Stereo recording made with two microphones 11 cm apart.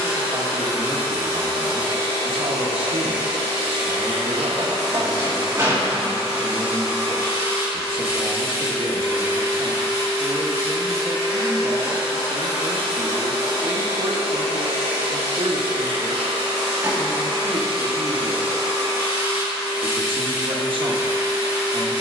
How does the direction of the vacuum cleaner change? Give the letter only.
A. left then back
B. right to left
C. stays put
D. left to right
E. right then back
C.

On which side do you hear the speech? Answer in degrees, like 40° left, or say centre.
50° right.